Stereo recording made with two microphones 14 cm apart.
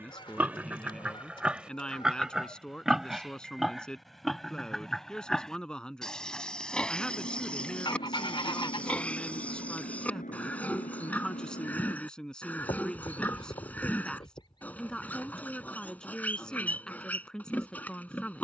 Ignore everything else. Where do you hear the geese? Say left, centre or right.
left.